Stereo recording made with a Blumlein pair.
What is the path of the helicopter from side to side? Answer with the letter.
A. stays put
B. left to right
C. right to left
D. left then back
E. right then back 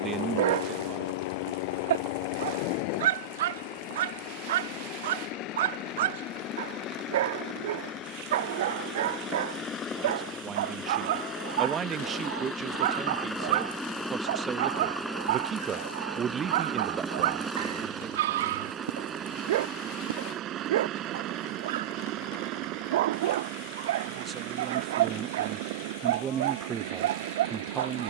B.